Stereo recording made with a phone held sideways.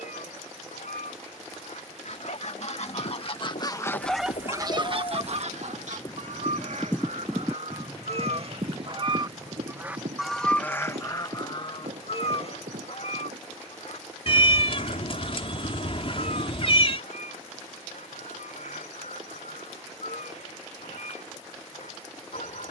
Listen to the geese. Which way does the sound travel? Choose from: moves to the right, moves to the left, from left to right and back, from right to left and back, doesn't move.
from left to right and back.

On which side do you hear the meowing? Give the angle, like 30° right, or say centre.
50° left.